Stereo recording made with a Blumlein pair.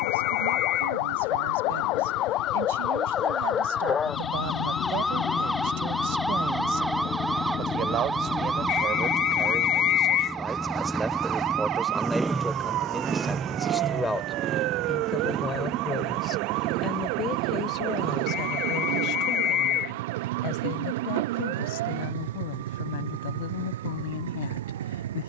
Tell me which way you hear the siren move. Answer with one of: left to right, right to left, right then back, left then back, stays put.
left to right.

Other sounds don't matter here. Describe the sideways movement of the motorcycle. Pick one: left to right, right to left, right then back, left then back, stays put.
left to right.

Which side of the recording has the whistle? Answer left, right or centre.
left.